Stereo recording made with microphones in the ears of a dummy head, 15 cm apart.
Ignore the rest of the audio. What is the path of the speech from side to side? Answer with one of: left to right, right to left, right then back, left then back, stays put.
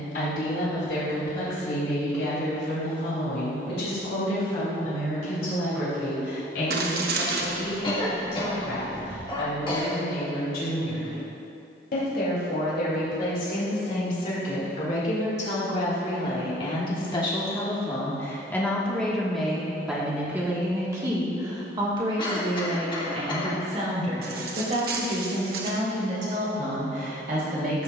left to right.